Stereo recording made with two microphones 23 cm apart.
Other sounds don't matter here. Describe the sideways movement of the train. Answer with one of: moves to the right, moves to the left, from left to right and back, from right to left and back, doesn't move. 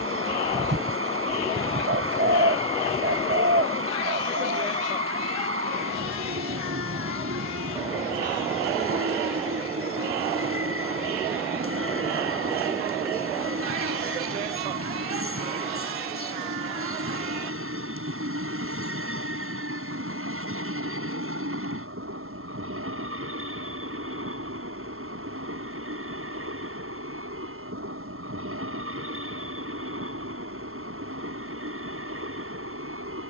doesn't move.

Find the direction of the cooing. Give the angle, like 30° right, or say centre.
50° right.